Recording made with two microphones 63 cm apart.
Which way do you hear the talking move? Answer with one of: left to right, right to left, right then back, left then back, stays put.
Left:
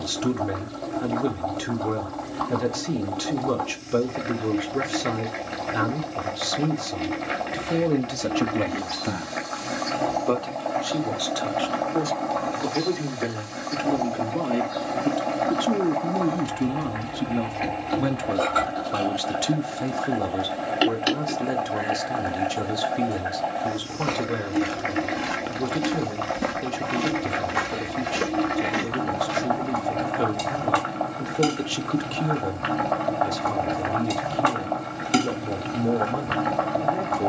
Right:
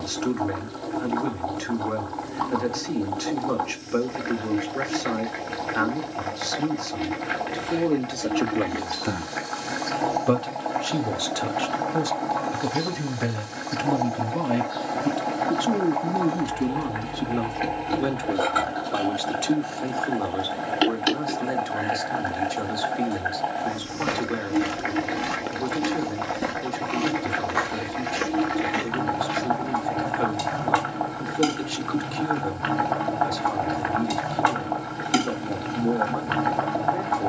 right then back.